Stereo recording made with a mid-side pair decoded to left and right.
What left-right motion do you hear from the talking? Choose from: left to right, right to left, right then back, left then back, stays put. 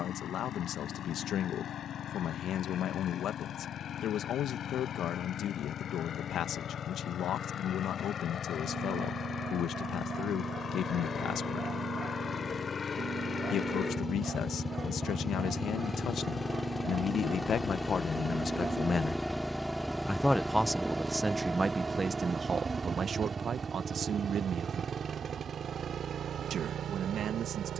left to right.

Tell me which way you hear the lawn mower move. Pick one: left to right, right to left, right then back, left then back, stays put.
left to right.